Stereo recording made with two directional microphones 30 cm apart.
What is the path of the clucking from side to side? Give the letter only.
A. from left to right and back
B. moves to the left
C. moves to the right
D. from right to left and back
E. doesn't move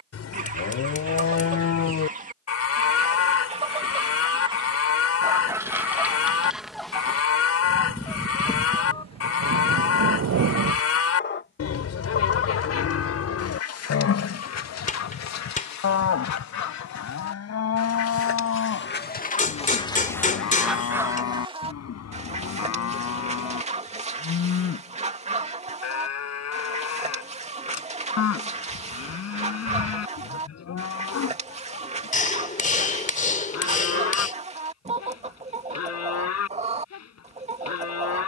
D.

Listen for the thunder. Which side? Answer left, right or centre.
right.